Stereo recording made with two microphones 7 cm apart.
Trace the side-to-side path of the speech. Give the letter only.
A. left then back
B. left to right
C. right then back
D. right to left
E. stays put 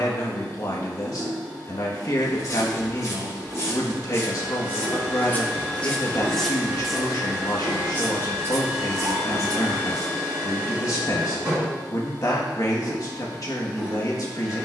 E.